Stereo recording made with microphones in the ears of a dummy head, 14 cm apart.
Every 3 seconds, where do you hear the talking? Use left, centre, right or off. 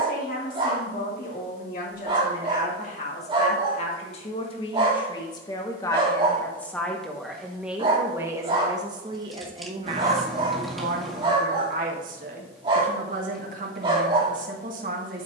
left, left, centre, right, right.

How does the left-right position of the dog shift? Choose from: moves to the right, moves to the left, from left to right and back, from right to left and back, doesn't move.
doesn't move.